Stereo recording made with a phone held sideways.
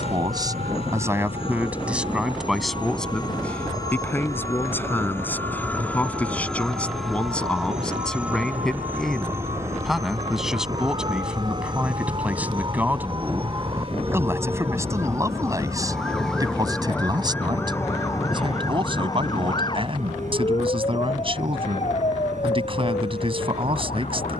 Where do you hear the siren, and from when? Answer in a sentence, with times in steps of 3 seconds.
In this clip you hear the siren on the right from 0 s, in the centre from 15 s and on the left from 18 s.